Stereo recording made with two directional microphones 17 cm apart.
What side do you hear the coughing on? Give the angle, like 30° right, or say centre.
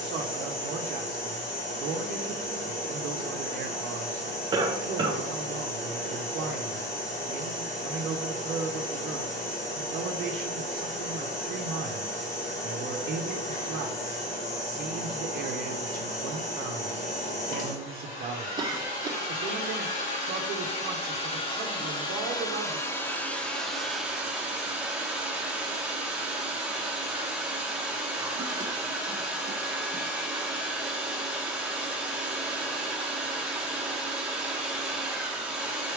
30° right.